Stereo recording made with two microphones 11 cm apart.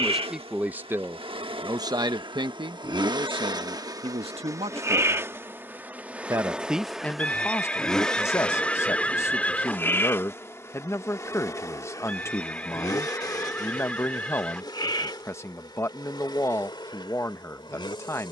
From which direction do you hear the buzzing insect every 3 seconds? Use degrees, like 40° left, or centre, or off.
60° right, 30° right, centre, 20° left, 40° left, 50° left.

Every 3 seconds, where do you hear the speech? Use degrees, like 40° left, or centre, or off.
30° right, 60° right, 10° left, 30° left, 30° left, 30° left.